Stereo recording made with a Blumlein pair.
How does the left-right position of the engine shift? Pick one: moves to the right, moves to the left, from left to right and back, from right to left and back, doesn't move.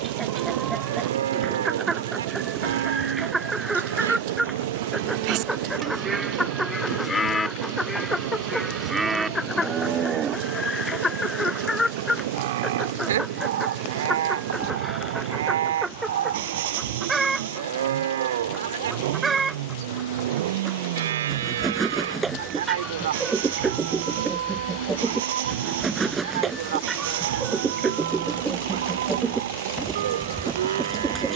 doesn't move.